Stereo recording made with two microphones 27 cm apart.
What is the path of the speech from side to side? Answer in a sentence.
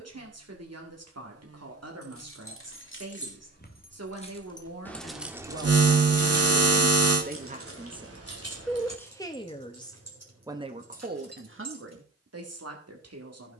You can hear the speech go left and come back.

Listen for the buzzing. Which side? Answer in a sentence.
You can hear the buzzing on the right.